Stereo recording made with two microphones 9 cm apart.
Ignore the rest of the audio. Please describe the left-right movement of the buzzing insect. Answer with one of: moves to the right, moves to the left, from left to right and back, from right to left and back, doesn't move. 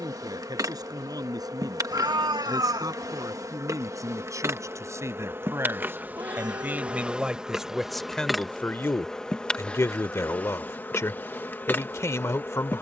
moves to the left.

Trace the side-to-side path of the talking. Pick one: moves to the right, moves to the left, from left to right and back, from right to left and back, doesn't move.
moves to the left.